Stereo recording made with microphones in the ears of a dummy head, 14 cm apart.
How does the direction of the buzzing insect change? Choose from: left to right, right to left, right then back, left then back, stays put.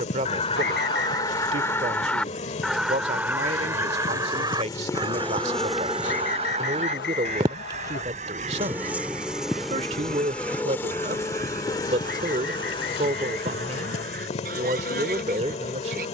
right then back.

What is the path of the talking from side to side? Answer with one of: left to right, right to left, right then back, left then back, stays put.
stays put.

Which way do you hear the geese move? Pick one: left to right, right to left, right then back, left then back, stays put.
left to right.